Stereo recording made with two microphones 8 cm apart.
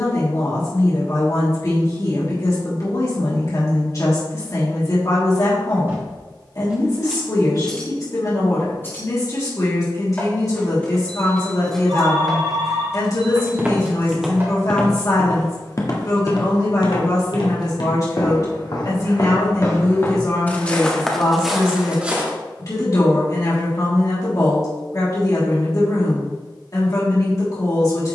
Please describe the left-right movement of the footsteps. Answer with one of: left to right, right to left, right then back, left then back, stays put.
left then back.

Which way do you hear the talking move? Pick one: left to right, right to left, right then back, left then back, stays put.
stays put.